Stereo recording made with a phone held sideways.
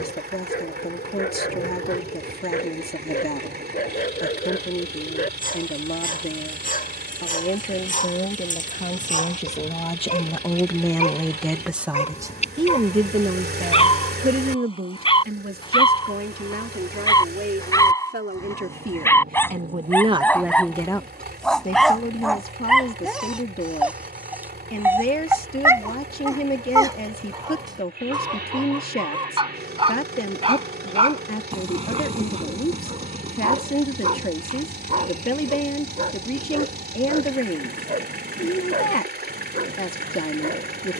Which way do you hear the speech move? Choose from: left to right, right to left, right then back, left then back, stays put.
right then back.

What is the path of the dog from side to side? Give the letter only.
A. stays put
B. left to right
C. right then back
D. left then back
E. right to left
B.